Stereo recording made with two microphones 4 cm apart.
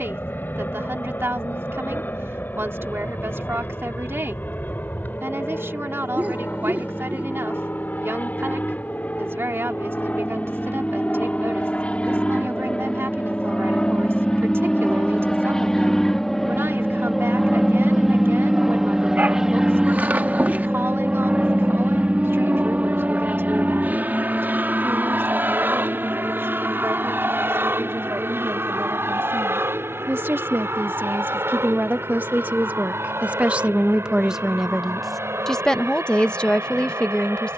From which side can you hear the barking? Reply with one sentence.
In this clip you hear the barking on the right.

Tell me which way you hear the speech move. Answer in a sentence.
You can hear the speech go from the right side to the left.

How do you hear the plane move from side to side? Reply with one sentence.
In this clip you hear the plane go from the left side to the right.